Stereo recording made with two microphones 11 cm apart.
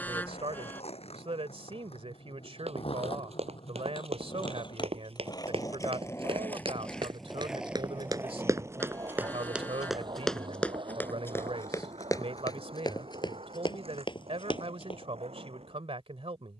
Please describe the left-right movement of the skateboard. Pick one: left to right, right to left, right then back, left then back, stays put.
left to right.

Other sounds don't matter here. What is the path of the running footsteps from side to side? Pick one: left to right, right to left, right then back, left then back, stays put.
right to left.